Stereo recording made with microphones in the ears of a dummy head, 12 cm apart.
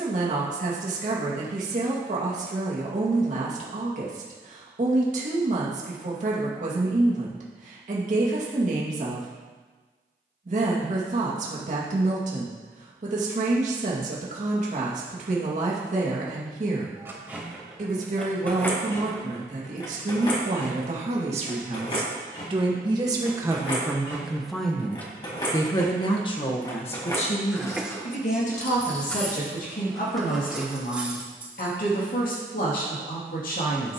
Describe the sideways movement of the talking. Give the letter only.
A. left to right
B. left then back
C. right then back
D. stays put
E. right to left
E.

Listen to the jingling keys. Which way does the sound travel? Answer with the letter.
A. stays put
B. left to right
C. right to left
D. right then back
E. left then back
E.